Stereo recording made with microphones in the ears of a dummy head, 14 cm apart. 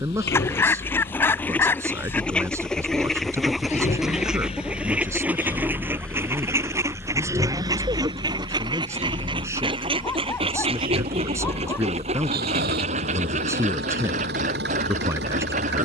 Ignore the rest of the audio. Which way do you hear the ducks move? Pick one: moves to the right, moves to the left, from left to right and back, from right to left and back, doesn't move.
moves to the right.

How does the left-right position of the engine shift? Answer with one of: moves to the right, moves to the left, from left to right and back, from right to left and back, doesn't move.
moves to the right.